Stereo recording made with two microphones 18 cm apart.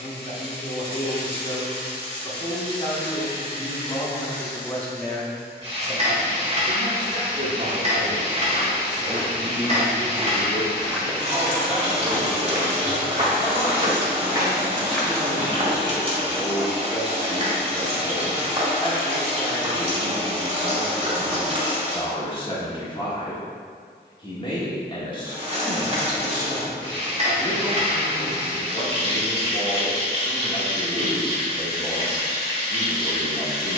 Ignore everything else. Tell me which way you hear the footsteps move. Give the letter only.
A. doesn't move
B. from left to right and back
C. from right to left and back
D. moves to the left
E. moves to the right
B.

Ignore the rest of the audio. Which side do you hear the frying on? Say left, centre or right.
right.